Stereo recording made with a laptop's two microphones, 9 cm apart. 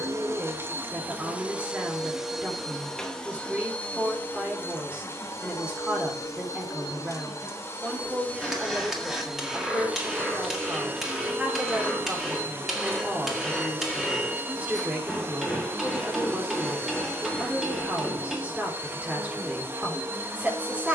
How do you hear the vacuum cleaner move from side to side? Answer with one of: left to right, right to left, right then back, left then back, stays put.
left then back.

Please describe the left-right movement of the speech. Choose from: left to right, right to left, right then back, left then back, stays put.
stays put.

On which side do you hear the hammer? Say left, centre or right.
centre.